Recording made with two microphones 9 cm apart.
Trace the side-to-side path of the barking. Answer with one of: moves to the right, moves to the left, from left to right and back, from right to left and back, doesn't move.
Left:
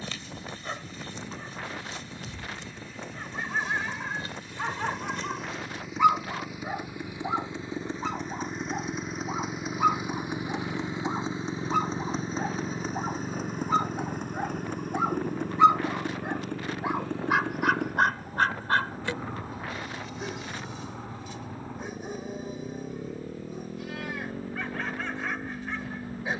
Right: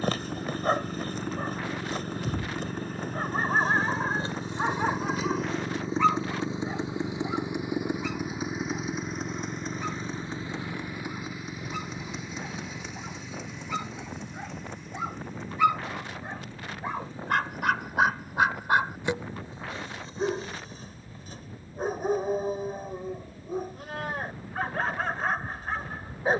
from right to left and back.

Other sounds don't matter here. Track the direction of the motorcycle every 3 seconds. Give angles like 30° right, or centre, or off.
50° right, 40° right, 20° right, 20° left, 40° left, 60° left, 70° left, 70° left, 80° left.